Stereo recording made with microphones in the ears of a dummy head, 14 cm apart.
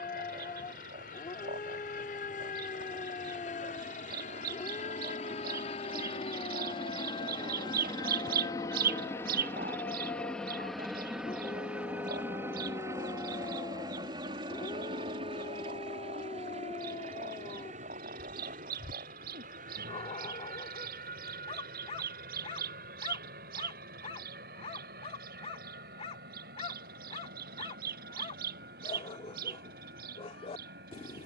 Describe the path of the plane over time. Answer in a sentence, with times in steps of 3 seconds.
In this clip you hear the plane on the left from 0 s, in the centre from 9 s and on the right from 12 s.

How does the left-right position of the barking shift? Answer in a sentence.
You can hear the barking stay in one place.